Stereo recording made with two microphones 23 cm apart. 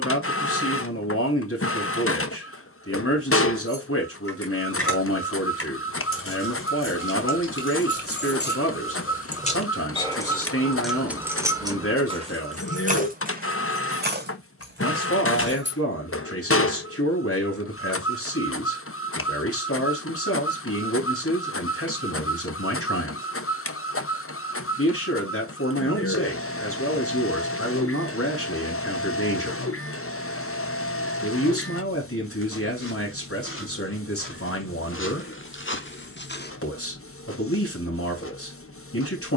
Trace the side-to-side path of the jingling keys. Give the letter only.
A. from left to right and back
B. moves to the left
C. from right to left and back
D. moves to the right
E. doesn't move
D.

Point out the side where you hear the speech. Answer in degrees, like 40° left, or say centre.
80° left.